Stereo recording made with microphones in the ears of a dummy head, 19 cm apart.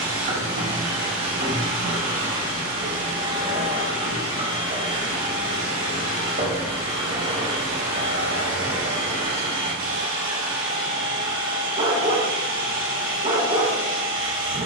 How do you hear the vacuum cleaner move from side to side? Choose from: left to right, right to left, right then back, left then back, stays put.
stays put.